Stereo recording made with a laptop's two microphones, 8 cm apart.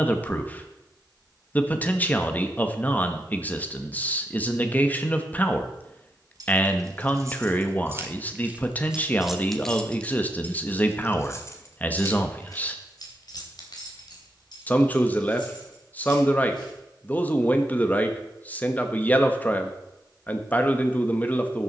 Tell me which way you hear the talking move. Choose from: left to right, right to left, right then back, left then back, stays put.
stays put.